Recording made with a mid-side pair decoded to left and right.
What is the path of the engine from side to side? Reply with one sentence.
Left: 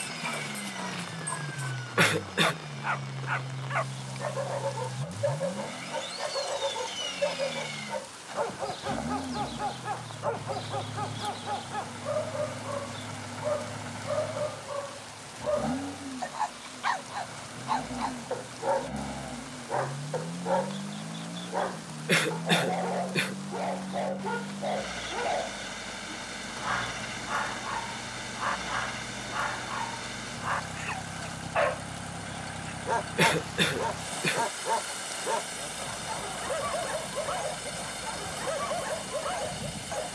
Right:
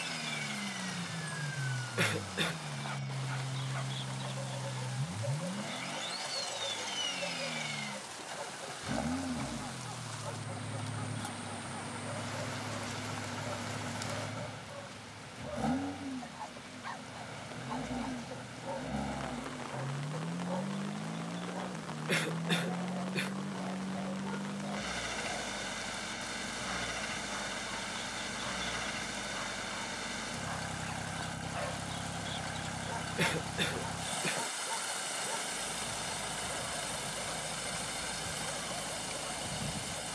You can hear the engine stay put.